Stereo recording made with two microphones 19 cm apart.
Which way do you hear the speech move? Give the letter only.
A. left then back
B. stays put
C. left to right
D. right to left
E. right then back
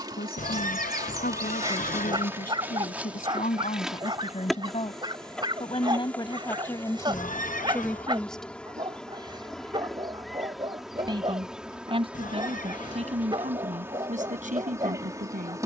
C.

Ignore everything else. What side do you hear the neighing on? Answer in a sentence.
In this clip you hear the neighing on the left.